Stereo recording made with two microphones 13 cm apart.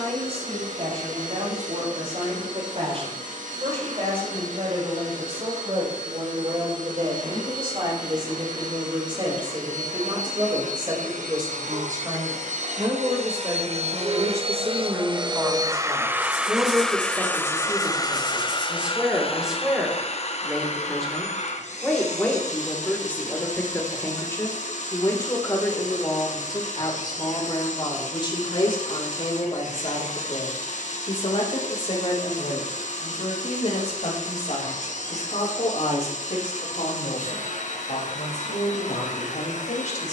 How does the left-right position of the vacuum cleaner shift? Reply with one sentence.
In this clip you hear the vacuum cleaner travel towards the left.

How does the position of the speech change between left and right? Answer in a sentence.
You can hear the speech move to the left.